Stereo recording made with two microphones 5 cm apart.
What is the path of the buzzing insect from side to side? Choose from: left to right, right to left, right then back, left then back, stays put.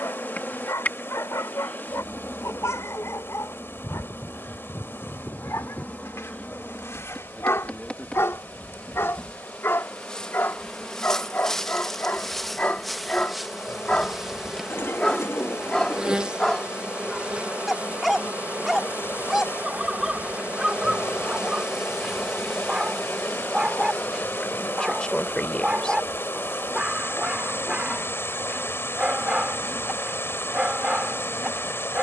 right then back.